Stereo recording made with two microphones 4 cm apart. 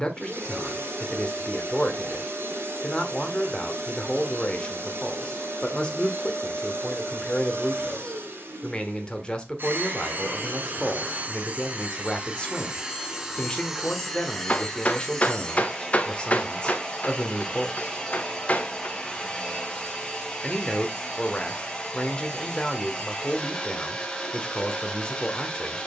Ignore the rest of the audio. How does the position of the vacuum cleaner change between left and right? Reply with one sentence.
You can hear the vacuum cleaner move from right to left.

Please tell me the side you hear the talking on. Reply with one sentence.
In this clip you hear the talking on the left.